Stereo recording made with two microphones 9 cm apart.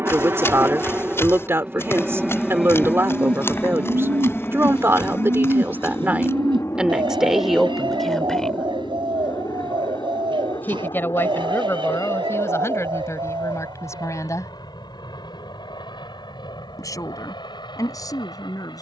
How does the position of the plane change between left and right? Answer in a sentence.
In this clip you hear the plane move from right to left.